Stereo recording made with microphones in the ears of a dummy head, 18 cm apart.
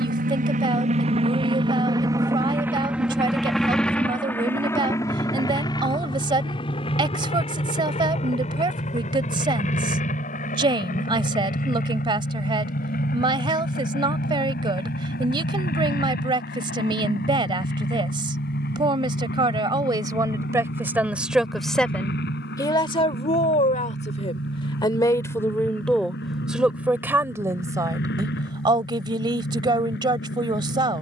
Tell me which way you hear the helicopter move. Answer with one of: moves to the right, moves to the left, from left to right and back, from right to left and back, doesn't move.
moves to the left.